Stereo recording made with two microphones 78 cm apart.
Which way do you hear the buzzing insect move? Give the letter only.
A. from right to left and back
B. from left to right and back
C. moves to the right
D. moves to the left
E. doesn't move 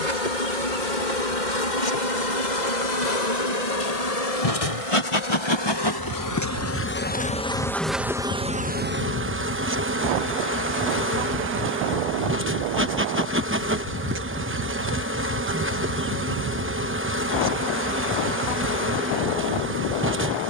C.